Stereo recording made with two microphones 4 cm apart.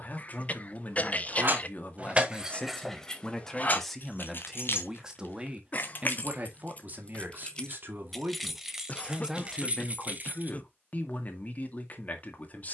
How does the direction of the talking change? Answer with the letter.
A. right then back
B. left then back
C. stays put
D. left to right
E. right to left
A.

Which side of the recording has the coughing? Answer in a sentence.
You can hear the coughing on the left.